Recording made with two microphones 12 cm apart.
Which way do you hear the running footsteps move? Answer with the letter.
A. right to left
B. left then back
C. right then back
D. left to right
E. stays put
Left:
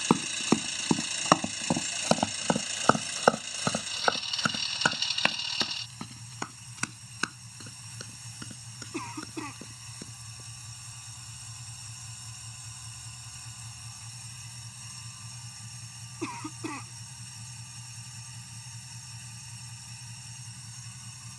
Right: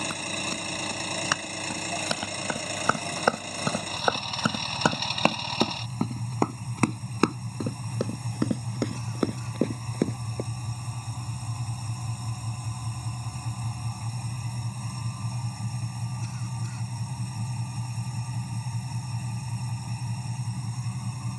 D.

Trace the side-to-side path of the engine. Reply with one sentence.
In this clip you hear the engine stay put.